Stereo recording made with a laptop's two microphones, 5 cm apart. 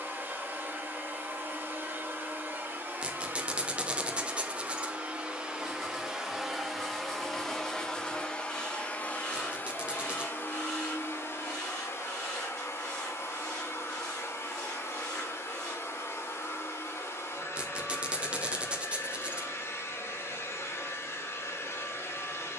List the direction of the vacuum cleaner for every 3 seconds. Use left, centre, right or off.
right, right, centre, left, left, left, left, left.